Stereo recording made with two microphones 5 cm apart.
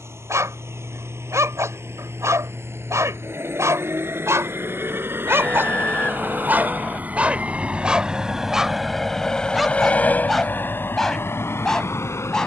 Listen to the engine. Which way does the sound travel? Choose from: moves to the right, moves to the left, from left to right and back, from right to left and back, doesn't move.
moves to the left.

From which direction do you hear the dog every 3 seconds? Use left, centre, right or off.
right, right, right, centre.